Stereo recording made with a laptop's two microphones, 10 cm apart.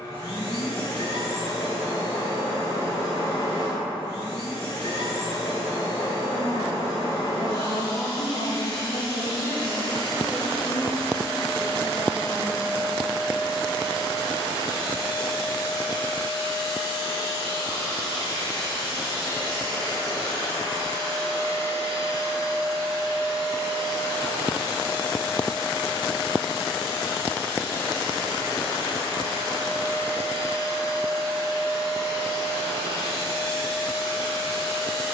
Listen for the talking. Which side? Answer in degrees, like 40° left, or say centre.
50° left.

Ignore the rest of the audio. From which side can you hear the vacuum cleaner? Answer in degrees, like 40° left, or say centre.
70° left.